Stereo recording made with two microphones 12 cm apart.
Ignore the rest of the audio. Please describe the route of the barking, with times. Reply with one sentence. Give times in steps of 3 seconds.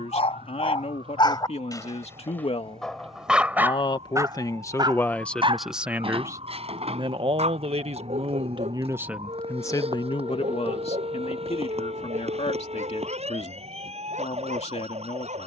In this clip you hear the barking on the left from 0 s and on the right from 3 s.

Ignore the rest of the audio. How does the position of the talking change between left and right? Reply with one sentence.
In this clip you hear the talking go right and come back.